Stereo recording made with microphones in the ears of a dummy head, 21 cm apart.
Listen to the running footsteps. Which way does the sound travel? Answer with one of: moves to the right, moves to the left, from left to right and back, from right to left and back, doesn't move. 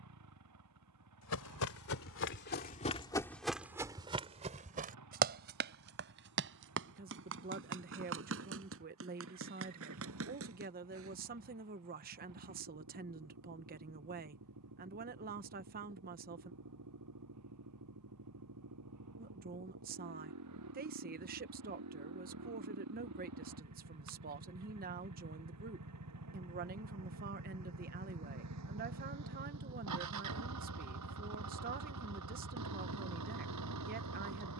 moves to the right.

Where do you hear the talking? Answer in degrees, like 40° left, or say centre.
40° right.